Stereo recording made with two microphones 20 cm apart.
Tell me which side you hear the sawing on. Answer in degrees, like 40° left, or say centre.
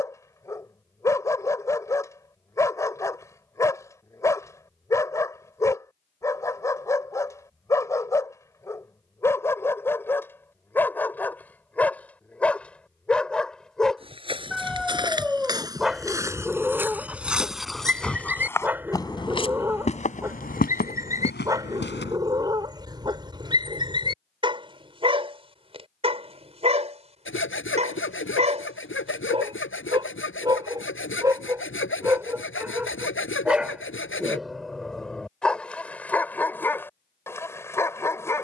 80° left.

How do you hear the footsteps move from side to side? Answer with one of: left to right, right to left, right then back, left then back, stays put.
right to left.